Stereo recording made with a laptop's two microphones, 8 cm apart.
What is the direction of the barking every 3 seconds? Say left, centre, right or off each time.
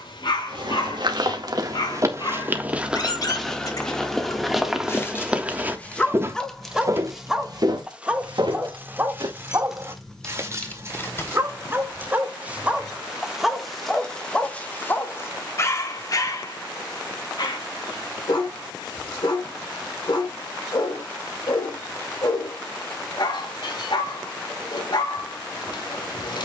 left, left, centre, right, centre, left, left, left, left.